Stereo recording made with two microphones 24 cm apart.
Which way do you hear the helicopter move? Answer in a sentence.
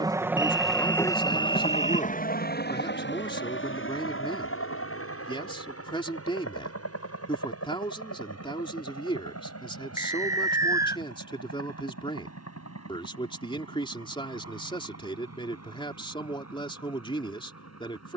In this clip you hear the helicopter move to the left.